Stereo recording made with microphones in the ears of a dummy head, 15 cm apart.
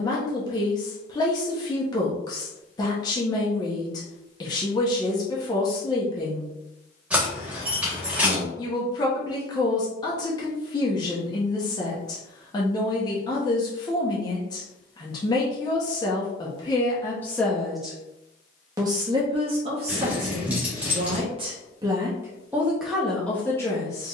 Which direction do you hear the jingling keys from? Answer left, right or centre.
centre.